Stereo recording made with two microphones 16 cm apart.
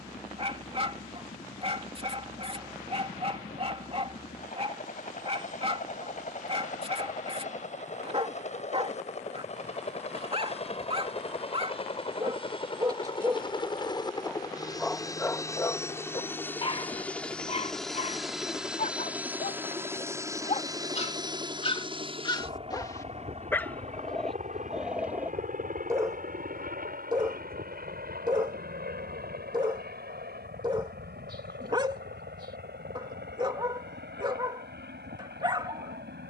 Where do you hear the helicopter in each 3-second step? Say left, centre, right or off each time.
left, left, left, left, left, centre, centre, right, right, right, right, right.